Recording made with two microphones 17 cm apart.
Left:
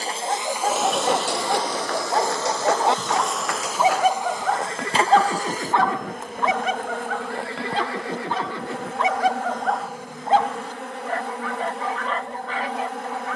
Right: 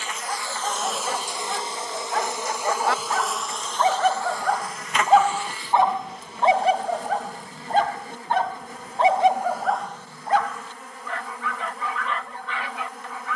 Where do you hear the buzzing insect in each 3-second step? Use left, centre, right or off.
centre, left, left, left, left.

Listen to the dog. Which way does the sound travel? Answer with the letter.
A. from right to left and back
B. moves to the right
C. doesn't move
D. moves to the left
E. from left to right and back
E.